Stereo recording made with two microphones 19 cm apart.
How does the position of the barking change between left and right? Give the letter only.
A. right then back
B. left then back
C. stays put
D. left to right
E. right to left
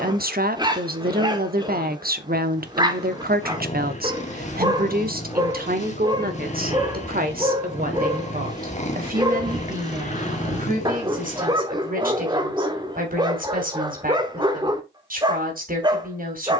C.